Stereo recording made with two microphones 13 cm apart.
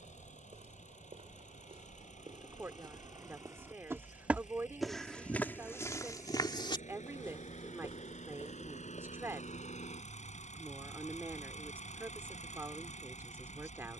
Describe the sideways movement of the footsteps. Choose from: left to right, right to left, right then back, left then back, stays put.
right to left.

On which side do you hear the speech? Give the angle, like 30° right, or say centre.
20° right.